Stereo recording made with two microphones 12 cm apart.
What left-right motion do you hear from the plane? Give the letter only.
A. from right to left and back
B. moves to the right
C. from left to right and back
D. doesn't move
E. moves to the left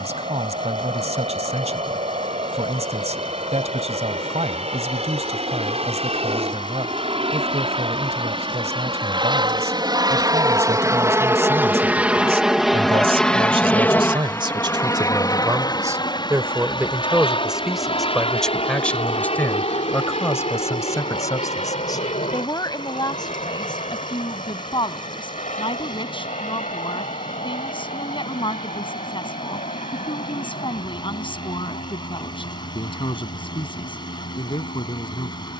E.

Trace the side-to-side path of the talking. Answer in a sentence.
In this clip you hear the talking move to the left.